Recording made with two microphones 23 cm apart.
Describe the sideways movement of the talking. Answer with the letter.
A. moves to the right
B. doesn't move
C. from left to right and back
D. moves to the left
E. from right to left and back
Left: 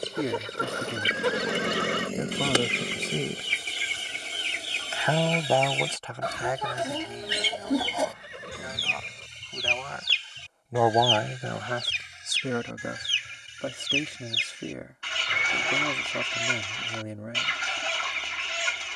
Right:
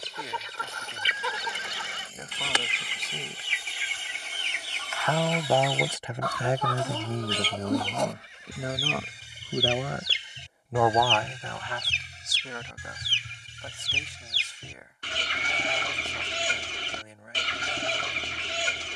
C.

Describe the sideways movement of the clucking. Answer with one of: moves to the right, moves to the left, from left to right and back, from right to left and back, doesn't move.
moves to the right.